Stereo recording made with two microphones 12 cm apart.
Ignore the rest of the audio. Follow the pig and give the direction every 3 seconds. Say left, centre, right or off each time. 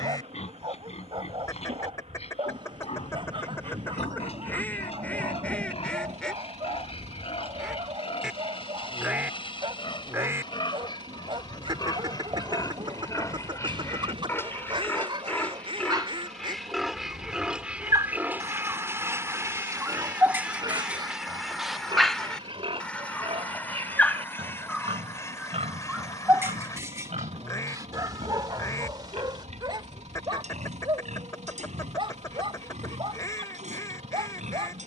left, left, left, left, left, centre, right, right, right, right, right, right.